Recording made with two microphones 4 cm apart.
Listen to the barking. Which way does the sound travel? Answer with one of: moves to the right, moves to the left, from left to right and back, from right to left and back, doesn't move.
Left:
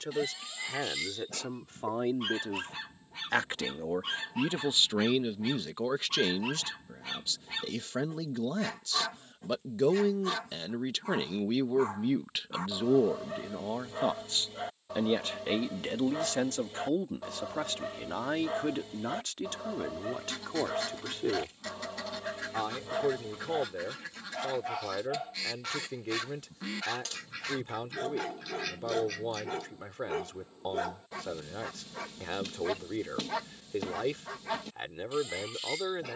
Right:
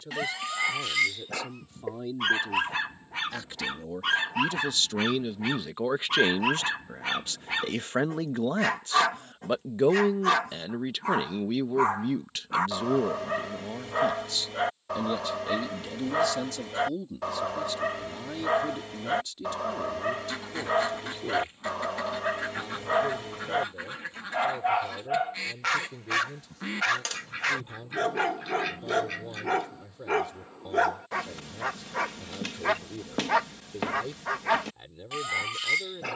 doesn't move.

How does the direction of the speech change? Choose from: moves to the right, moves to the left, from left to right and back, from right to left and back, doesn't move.
from left to right and back.